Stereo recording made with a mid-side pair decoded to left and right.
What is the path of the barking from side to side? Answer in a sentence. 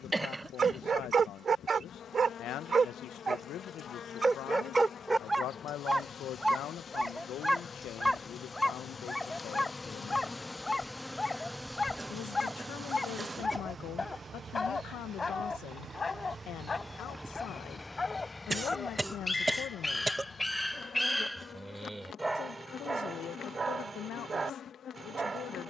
You can hear the barking move from right to left and back again.